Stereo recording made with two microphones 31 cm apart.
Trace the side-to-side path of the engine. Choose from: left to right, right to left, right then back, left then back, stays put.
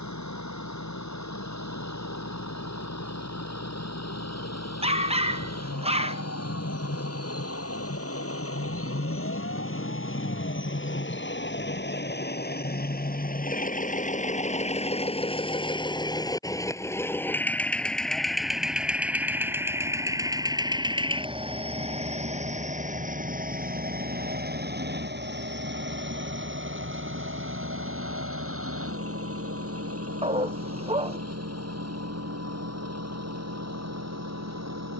left to right.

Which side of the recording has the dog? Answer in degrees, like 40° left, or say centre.
20° right.